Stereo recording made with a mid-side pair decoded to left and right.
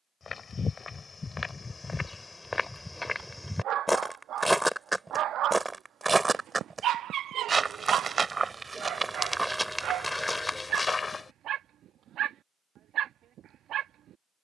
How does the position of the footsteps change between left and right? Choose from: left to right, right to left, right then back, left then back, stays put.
right then back.